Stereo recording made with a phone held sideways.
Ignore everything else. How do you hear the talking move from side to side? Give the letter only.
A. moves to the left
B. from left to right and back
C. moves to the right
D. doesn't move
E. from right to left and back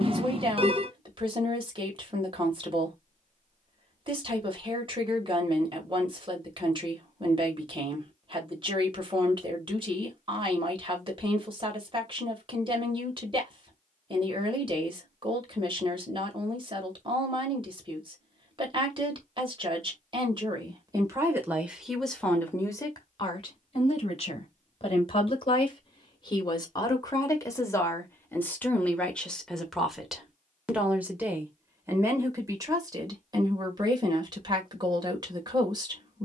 E.